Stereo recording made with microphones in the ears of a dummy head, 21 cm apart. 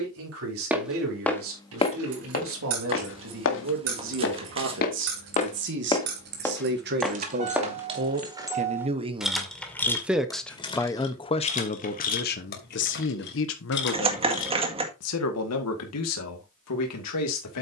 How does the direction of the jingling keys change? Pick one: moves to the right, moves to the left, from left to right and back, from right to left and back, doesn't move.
moves to the left.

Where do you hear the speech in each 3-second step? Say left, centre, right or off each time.
right, right, right, centre, left, left.